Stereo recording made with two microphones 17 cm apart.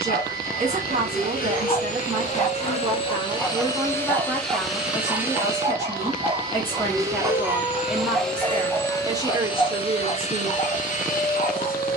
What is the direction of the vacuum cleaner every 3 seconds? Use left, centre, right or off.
left, centre, centre, left.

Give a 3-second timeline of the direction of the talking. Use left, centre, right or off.
right, centre, centre, right.